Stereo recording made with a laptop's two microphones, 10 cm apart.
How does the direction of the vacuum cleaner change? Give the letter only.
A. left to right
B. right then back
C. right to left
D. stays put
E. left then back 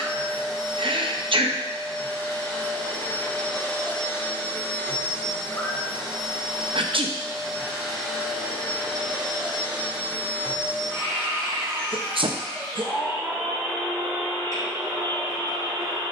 A.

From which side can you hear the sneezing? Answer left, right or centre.
right.